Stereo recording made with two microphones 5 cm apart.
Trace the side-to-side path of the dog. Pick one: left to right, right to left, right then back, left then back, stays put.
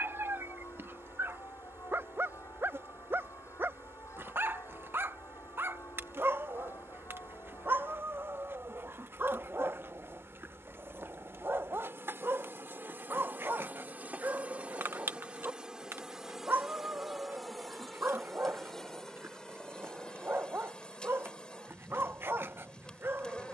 stays put.